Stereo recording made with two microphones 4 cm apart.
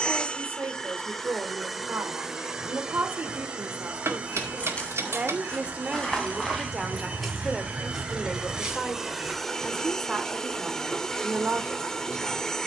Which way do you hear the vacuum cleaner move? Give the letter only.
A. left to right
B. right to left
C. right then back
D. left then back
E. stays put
C.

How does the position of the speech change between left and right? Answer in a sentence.
You can hear the speech go left and come back.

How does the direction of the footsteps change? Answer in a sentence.
In this clip you hear the footsteps move from left to right.